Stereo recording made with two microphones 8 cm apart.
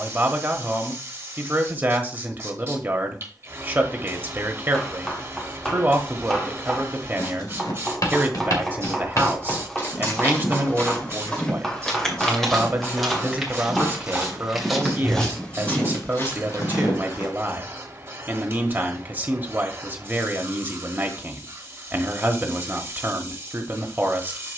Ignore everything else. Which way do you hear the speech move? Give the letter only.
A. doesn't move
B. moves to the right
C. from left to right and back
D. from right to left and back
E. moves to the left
A.